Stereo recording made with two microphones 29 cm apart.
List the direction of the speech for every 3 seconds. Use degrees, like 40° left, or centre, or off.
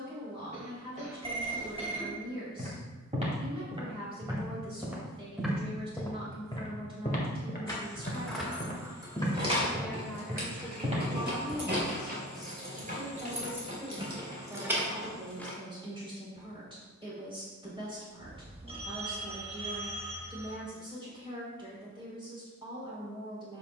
20° right, 20° right, 20° right, centre, 10° right, 20° right, 20° right, 20° right.